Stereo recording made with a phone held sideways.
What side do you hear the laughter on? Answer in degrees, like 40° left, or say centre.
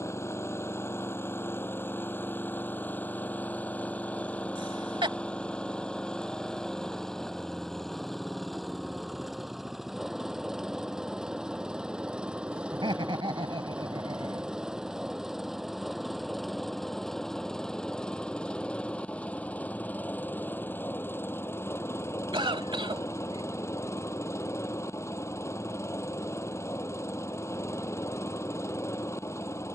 40° right.